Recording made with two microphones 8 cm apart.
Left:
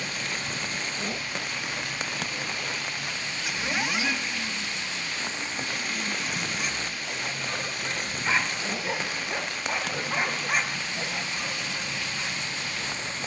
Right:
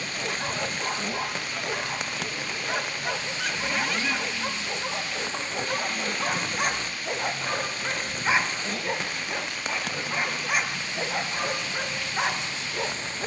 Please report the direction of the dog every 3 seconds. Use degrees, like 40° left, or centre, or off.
70° right, 70° right, 40° right, 10° right, 70° right.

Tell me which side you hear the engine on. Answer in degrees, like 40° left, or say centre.
10° left.